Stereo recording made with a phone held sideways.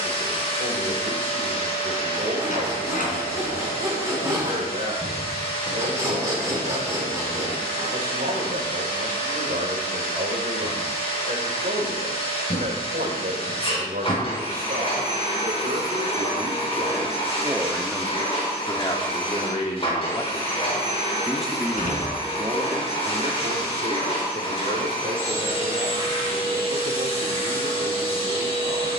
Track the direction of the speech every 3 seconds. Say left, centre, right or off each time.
right, right, right, right, right, right, left, right, right, right.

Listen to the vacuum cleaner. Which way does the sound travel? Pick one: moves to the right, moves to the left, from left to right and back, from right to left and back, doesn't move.
doesn't move.